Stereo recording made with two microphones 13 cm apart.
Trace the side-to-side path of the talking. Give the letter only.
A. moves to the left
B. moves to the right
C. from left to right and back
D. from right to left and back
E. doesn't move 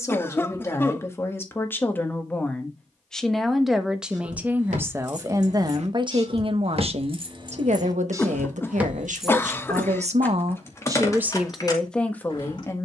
C.